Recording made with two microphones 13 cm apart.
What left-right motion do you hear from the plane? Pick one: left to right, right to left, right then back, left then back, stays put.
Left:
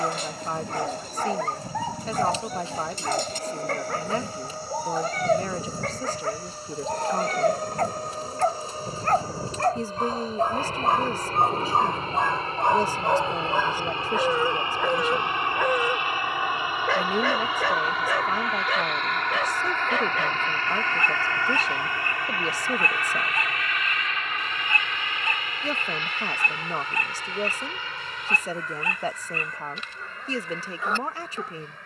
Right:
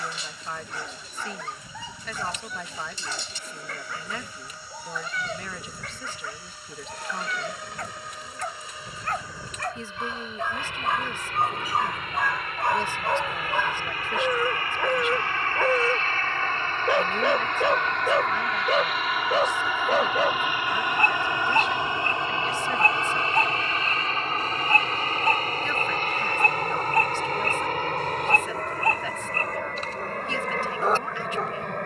left to right.